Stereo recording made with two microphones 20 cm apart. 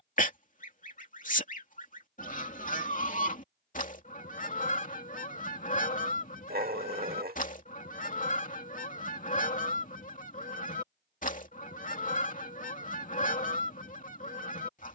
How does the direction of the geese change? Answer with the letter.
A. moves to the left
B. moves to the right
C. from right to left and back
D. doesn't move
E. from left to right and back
D.